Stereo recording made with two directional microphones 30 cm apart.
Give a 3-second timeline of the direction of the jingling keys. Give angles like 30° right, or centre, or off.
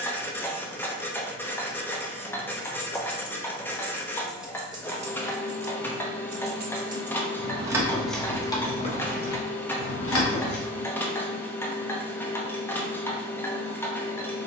50° left, 10° right, 10° right, 40° left, off.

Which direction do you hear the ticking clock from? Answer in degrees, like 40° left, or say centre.
10° left.